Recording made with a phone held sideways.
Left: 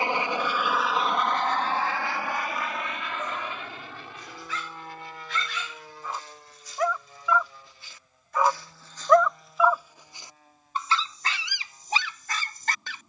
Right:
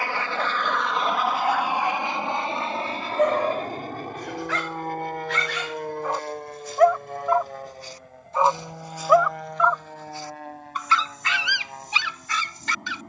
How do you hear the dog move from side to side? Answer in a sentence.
You can hear the dog travel towards the left.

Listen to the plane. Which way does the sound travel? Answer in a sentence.
You can hear the plane move to the right.